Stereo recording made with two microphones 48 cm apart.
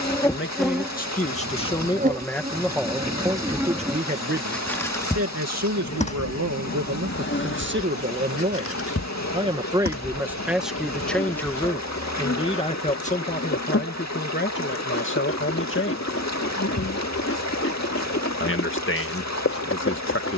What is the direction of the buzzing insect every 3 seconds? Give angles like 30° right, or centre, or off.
10° right, centre, 20° left, 30° left, 30° left, 30° left, 30° left.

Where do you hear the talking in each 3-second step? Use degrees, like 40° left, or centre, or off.
10° left, 20° right, 30° right, centre, 20° left, 20° left, 20° left.